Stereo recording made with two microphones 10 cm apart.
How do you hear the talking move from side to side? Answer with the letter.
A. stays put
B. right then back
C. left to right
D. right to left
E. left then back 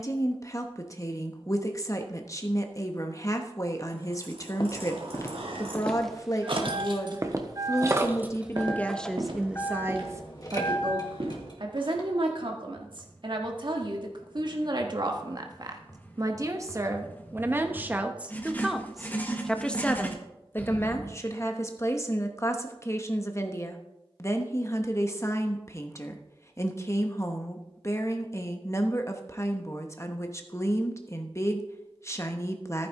B.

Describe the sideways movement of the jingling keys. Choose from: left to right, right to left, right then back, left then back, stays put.
right to left.